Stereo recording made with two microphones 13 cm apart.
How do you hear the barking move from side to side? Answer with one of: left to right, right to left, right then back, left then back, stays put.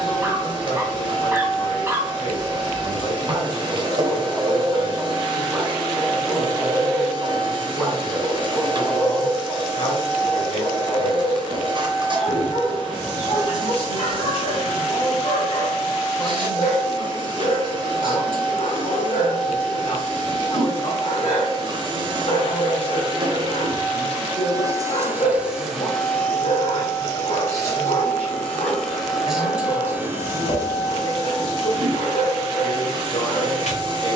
right to left.